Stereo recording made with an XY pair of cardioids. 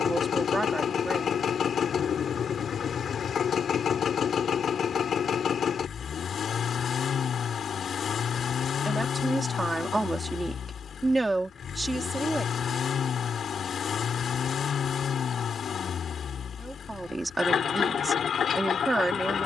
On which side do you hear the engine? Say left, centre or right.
left.